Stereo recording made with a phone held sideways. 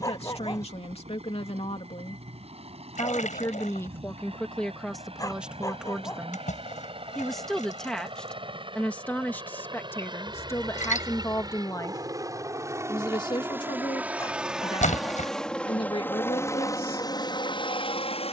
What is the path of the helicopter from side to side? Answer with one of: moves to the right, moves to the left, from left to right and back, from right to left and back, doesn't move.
moves to the left.